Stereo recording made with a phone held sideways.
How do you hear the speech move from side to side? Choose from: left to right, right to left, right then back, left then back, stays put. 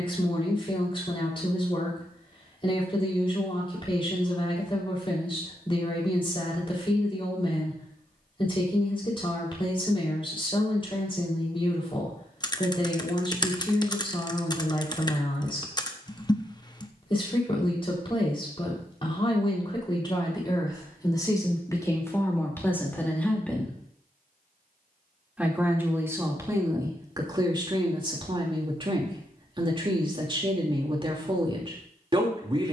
left to right.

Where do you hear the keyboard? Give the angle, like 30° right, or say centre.
30° left.